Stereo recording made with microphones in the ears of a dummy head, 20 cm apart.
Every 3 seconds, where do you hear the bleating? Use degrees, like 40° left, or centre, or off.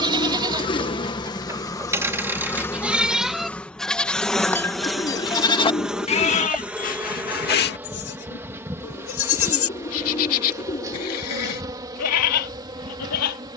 10° right, 10° left, 40° left, 70° left, 80° left.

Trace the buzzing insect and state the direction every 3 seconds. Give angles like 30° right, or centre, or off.
20° left, centre, 10° right, 10° right, 20° right.